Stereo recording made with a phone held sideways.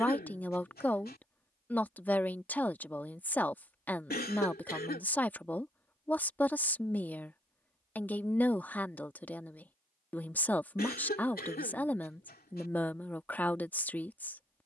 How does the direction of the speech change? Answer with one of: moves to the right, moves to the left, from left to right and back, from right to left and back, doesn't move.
doesn't move.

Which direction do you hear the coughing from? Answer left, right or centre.
left.